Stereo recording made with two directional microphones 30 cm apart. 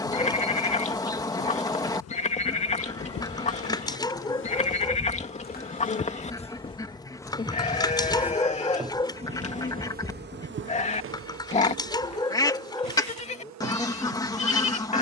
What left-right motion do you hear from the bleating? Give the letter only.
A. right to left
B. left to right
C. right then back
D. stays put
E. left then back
D.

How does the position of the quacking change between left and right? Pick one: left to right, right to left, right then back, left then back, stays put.
stays put.